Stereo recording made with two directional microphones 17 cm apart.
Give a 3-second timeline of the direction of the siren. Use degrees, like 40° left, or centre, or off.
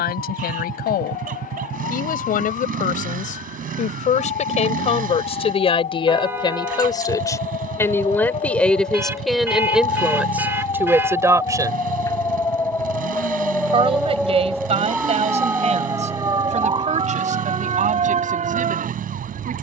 60° left, 50° left, 40° left, 30° left, 10° left, 30° right, 50° right.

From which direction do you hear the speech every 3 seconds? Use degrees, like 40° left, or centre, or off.
60° left, 40° left, 20° left, 10° right, 30° right, 40° right, 50° right.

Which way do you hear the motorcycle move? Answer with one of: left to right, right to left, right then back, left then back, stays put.
stays put.